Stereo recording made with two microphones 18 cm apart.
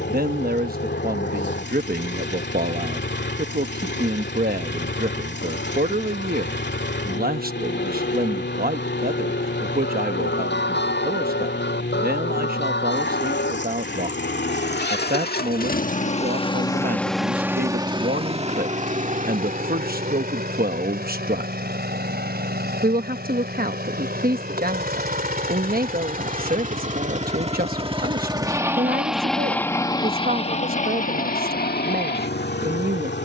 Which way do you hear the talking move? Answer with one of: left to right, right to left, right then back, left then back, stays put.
stays put.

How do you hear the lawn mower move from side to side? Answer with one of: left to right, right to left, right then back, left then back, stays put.
right then back.